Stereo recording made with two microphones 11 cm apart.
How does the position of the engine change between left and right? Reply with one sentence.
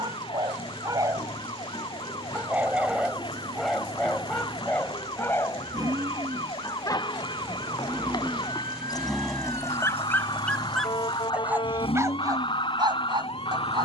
You can hear the engine travel towards the left.